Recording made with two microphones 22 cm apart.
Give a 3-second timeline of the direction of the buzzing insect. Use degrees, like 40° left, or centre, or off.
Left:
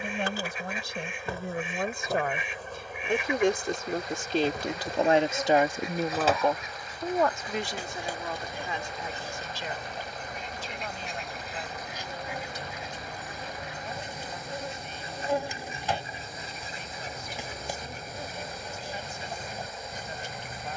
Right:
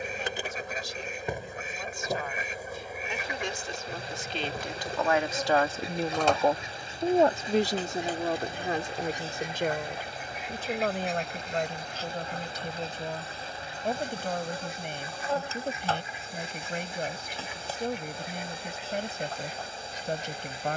20° right, centre, 10° left, 20° left, 20° left, 20° left, 20° left.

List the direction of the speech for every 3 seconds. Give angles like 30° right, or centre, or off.
70° left, 40° left, 40° right, 70° right, 70° right, 70° right, 70° right.